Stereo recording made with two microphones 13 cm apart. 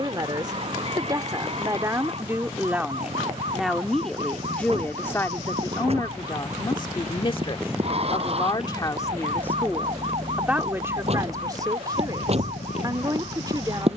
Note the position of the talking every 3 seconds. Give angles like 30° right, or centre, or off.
20° right, 10° left, 40° left, 10° right, 30° right.